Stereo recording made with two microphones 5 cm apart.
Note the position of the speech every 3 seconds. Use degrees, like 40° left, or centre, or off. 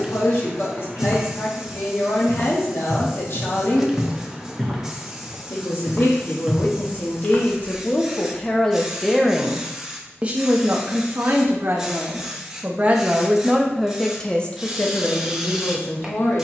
50° left, 50° left, 30° left, 30° right, 10° right, 50° left.